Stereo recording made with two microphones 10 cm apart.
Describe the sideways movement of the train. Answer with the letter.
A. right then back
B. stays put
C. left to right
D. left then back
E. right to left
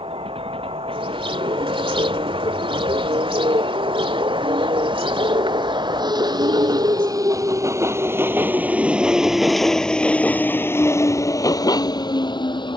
E.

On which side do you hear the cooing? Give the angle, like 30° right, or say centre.
60° right.